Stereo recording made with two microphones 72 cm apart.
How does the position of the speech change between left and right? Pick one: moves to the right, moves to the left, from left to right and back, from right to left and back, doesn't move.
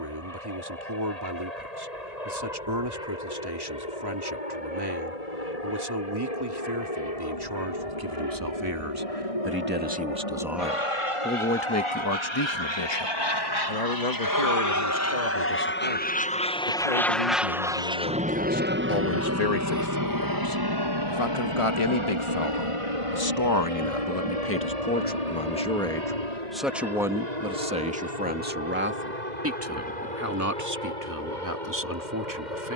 from right to left and back.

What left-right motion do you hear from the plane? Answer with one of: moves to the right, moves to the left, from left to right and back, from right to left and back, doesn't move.
moves to the right.